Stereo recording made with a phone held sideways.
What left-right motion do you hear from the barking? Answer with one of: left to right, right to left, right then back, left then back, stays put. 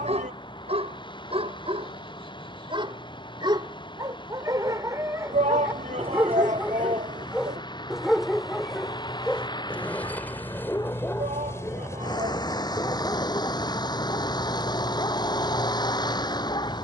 right to left.